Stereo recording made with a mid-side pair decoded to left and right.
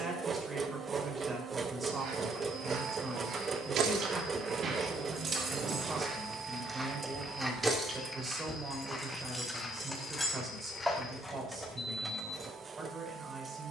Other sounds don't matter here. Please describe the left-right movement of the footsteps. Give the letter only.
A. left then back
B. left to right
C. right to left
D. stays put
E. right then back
C.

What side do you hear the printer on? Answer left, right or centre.
right.